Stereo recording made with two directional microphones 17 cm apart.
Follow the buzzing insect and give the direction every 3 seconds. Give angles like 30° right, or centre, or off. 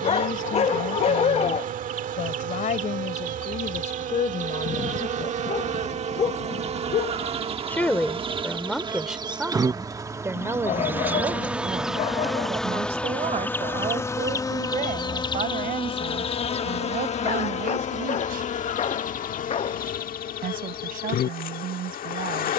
50° right, 50° right, 30° right, 20° right, 10° left, 30° left, 50° left, 60° left.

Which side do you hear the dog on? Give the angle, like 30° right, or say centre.
40° left.